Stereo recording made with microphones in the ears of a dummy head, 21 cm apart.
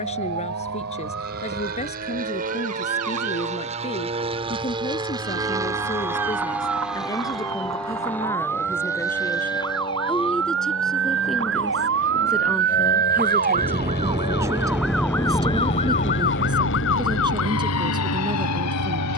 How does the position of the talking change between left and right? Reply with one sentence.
In this clip you hear the talking go from the left side to the right.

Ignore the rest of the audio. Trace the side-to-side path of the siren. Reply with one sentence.
You can hear the siren move from right to left.